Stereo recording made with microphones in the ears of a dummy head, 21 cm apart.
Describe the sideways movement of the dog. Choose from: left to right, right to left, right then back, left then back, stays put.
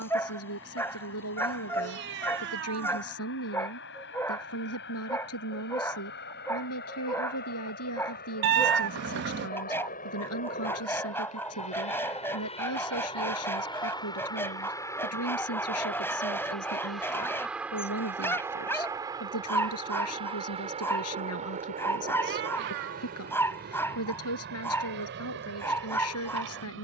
stays put.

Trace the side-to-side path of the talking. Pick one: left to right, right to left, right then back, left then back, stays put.
stays put.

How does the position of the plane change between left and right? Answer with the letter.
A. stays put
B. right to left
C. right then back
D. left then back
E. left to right
E.